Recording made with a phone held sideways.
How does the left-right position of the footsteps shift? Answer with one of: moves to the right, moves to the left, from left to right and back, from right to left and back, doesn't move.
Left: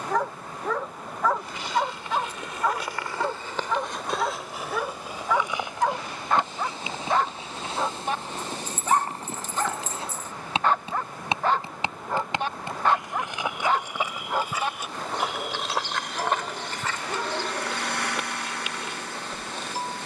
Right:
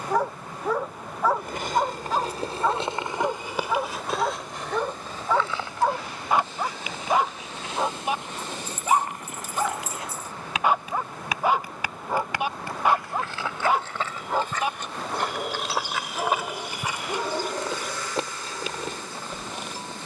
from right to left and back.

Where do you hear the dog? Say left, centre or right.
centre.